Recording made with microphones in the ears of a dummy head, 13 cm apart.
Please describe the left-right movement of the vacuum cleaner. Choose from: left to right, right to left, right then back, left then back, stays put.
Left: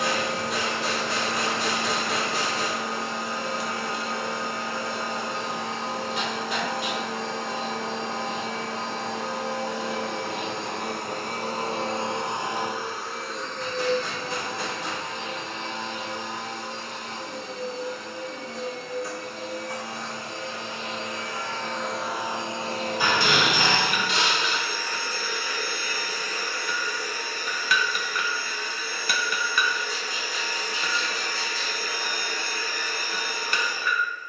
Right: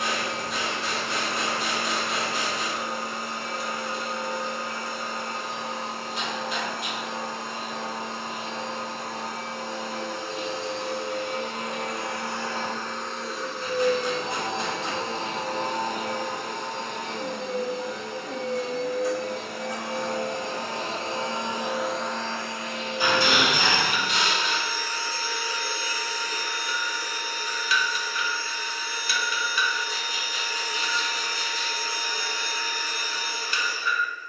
right then back.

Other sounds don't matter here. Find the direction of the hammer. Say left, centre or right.
left.